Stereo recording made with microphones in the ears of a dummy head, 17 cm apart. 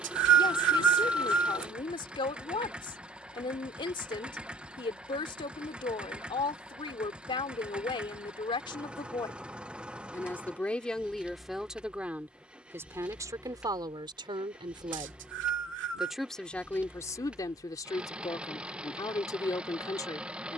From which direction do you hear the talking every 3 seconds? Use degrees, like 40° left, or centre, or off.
30° left, 30° left, 30° left, 10° left, 20° right, 10° left, 20° left.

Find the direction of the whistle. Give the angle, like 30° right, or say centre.
70° right.